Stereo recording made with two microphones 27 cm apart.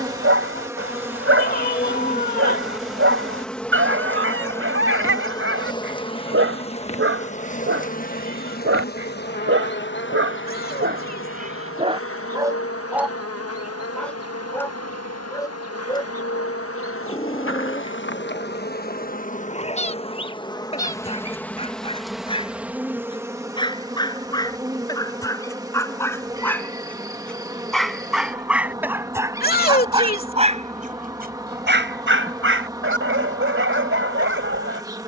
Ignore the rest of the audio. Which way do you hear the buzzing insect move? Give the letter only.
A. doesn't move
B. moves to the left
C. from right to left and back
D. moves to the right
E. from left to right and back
C.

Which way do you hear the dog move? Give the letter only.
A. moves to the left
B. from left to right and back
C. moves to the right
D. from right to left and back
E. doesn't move
D.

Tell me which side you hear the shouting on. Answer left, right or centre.
left.